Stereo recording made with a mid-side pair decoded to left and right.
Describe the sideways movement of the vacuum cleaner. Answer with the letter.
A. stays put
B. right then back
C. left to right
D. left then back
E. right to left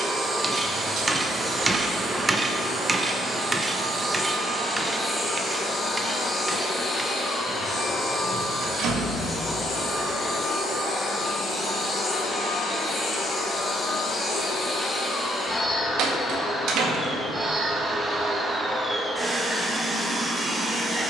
D.